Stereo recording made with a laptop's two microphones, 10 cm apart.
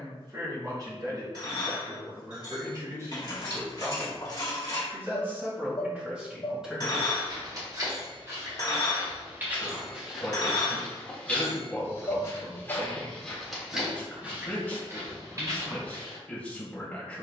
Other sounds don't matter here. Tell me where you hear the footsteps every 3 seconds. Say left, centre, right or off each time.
off, off, right, centre, centre, right.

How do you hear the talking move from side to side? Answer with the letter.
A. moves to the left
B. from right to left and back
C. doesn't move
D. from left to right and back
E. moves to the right
A.